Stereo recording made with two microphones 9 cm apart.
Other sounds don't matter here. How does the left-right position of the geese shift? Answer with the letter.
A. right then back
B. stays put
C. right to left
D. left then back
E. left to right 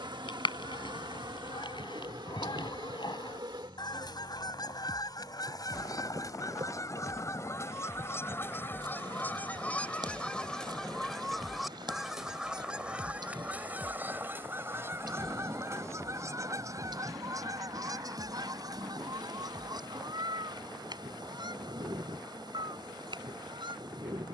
E.